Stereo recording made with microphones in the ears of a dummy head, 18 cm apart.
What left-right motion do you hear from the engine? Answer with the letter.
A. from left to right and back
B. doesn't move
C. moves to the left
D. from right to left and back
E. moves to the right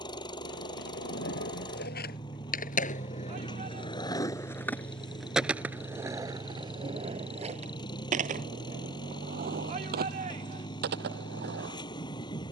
B.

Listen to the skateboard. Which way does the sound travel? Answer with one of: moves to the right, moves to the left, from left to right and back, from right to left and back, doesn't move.
moves to the right.